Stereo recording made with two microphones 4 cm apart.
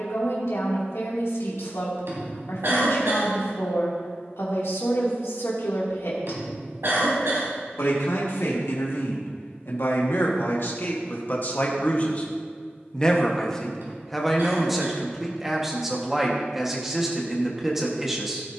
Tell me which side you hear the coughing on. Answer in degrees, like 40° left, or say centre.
70° right.